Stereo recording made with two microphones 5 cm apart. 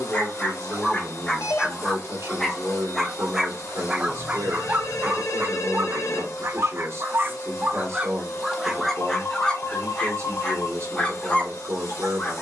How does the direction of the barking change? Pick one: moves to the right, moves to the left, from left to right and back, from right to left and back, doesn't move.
from left to right and back.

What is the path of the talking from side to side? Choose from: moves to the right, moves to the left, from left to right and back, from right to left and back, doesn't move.
doesn't move.